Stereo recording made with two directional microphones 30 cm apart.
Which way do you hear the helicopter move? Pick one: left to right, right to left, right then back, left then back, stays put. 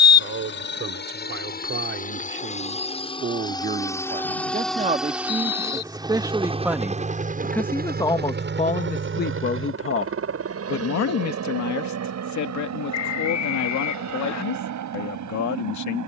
left to right.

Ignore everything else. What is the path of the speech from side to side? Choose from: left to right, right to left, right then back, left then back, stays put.
right to left.